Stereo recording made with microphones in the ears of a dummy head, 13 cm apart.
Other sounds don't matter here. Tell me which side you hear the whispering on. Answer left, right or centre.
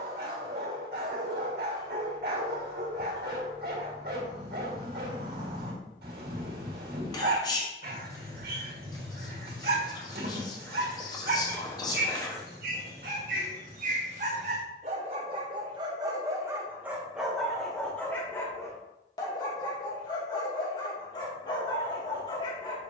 left.